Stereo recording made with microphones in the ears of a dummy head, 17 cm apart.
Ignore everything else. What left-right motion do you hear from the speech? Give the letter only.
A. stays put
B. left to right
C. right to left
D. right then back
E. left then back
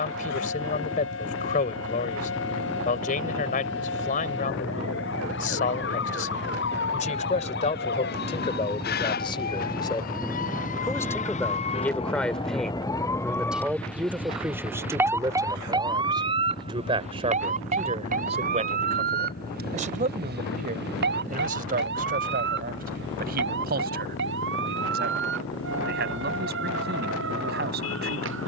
B.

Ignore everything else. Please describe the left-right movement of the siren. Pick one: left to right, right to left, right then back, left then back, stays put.
left to right.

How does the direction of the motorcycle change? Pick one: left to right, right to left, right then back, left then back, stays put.
right to left.